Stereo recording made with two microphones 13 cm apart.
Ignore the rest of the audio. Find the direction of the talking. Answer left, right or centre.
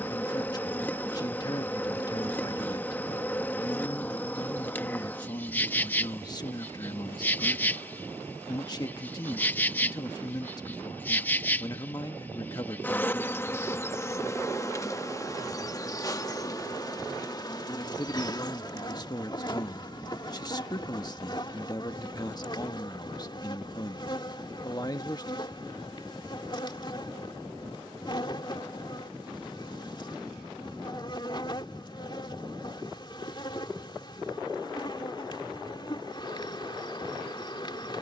left.